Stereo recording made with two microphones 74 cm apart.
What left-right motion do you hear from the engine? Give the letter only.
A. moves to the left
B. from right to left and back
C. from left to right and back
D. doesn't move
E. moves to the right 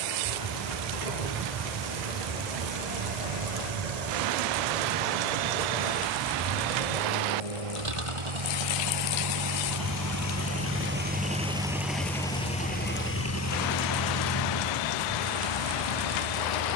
A.